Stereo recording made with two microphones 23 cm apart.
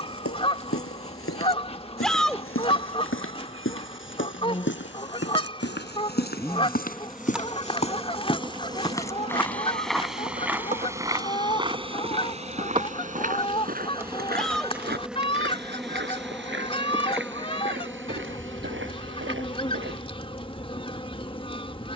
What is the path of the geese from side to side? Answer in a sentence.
In this clip you hear the geese stay in one place.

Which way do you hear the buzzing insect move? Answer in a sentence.
You can hear the buzzing insect go right and come back.